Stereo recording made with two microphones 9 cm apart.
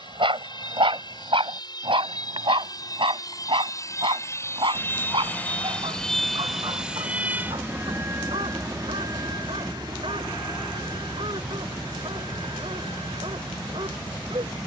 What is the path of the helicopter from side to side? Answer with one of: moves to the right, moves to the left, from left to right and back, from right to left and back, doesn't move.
moves to the right.